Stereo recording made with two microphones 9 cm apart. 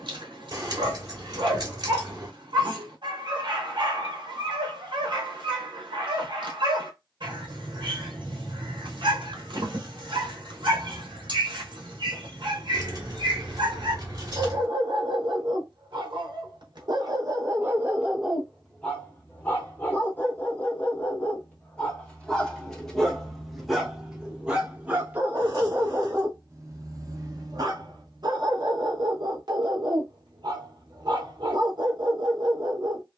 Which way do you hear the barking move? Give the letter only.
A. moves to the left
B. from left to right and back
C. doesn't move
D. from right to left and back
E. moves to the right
D.